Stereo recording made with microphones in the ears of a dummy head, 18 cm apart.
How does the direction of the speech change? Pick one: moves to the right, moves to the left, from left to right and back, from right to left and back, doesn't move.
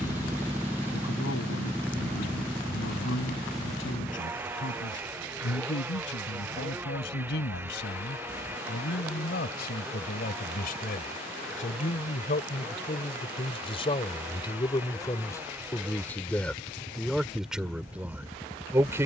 moves to the right.